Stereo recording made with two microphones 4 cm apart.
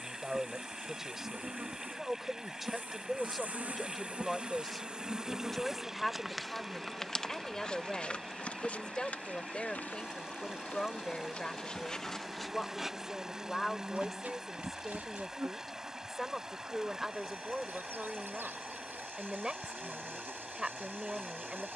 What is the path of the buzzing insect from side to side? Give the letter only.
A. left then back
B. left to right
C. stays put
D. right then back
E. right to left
A.